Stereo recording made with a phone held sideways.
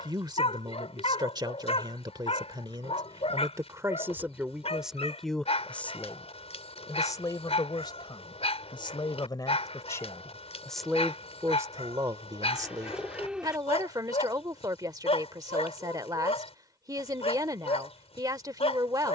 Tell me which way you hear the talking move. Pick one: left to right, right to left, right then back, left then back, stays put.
left then back.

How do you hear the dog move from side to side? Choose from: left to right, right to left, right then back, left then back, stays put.
stays put.